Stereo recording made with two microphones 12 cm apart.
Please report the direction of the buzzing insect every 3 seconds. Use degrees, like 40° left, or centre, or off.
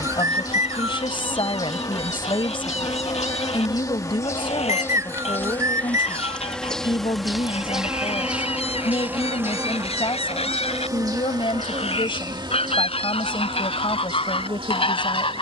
30° left, 20° left, centre, 30° right, 50° right.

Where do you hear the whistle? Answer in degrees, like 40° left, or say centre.
30° right.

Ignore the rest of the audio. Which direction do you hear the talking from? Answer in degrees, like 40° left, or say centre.
50° left.